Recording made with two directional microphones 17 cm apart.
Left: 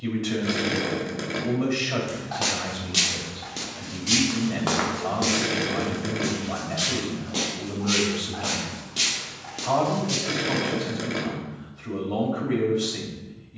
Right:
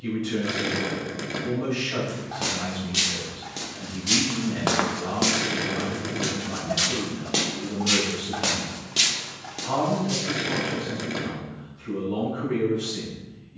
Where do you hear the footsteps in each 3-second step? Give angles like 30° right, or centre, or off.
20° left, 10° right, 50° right, centre, off.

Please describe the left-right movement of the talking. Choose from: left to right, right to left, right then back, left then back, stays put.
stays put.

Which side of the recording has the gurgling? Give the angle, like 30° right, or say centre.
centre.